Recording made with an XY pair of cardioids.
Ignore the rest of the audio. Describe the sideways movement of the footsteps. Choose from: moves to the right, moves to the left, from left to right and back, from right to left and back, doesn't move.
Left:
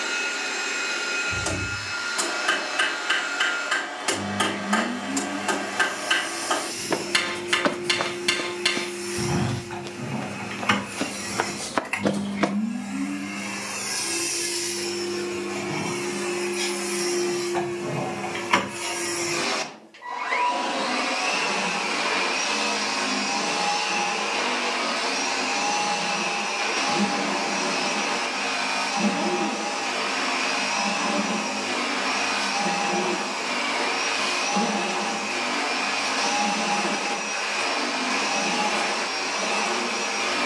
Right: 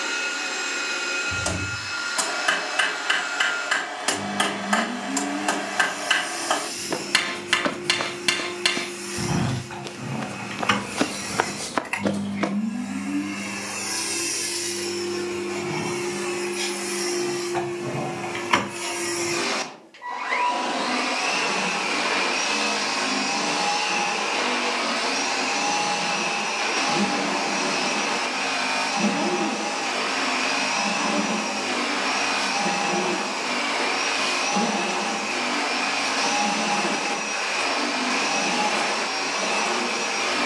from left to right and back.